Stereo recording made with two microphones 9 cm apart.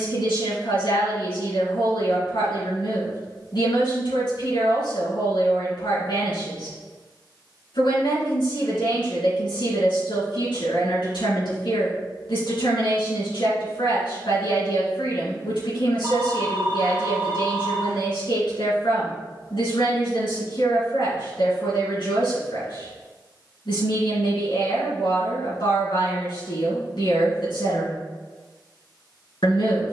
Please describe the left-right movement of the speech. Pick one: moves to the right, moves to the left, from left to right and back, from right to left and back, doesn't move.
doesn't move.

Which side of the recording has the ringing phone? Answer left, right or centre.
right.